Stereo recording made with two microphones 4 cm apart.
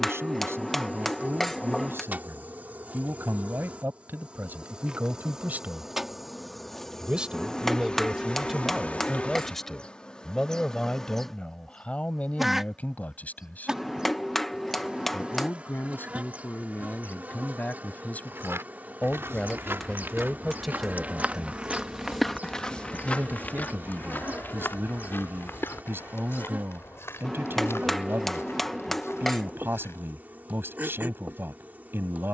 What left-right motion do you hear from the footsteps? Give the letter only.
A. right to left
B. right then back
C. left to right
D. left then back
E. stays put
A.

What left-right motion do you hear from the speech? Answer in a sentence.
In this clip you hear the speech move from right to left and back again.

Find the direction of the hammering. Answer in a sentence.
In this clip you hear the hammering in the centre.